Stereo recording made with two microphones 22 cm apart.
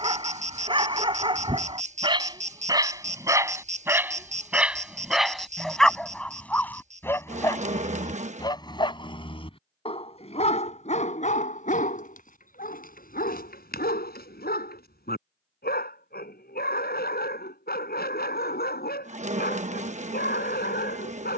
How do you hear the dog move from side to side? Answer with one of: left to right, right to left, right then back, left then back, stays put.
right to left.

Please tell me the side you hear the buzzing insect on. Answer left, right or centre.
right.